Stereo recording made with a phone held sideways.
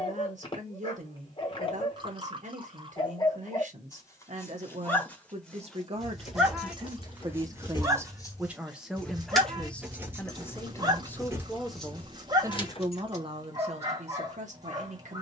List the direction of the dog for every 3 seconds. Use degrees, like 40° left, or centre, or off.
40° left, 20° left, 10° right, 30° right, 30° right.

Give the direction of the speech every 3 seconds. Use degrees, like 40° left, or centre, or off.
60° right, 60° right, 30° right, 10° left, 40° right.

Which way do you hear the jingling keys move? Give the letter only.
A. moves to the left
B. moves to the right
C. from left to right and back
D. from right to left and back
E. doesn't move
C.